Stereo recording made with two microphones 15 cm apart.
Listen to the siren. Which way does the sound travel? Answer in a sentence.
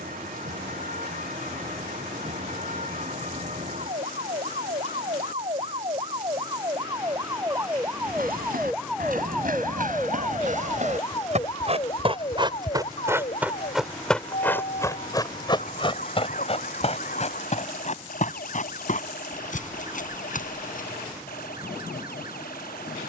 In this clip you hear the siren travel towards the left.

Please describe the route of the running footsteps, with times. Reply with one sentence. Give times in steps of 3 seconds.
In this clip you hear the running footsteps not at all from 0 s, on the right from 6 s, in the centre from 12 s, on the left from 15 s and not at all from 21 s.